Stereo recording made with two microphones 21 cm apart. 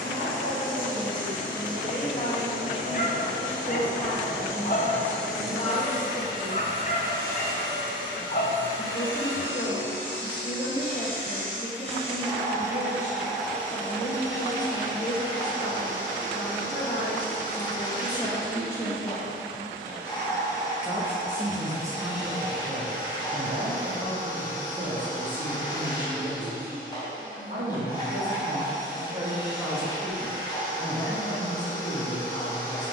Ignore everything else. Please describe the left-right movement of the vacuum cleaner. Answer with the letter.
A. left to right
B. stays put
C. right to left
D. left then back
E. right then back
E.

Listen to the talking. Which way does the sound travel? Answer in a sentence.
In this clip you hear the talking move from left to right and back again.